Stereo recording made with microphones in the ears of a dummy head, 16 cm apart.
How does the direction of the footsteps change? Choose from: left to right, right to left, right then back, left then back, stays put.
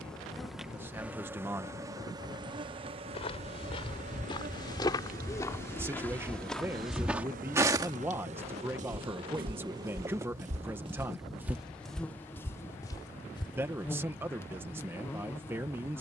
right then back.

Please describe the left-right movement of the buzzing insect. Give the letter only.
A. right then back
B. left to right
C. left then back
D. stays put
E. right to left
A.